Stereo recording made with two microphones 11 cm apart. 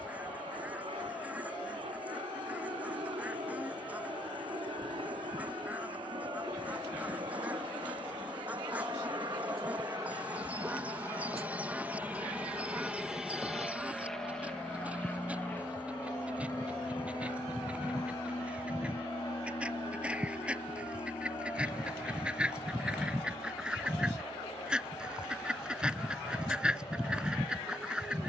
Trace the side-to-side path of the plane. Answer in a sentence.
In this clip you hear the plane move to the left.